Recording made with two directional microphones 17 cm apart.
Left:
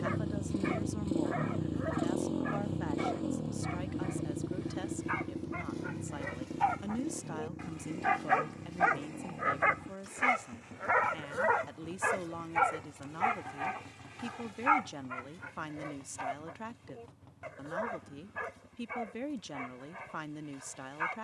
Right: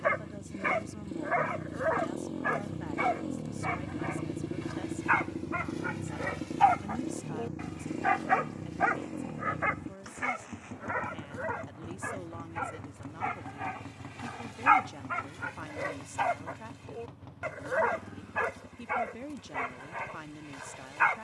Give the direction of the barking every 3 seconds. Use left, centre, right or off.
right, right, right, left, centre, right, right.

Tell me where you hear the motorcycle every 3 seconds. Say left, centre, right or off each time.
left, centre, right, right, right, right, right.